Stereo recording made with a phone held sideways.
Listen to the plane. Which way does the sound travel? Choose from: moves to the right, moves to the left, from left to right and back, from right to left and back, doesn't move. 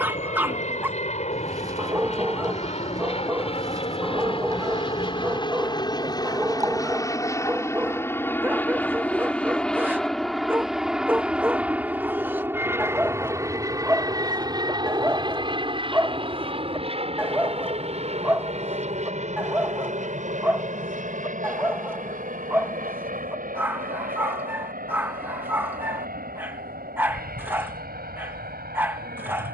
moves to the right.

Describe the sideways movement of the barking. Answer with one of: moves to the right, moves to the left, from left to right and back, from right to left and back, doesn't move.
doesn't move.